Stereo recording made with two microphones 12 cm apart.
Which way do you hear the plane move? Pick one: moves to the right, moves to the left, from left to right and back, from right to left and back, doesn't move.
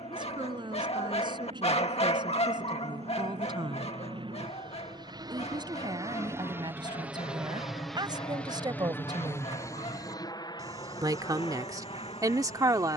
moves to the left.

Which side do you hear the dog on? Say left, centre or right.
left.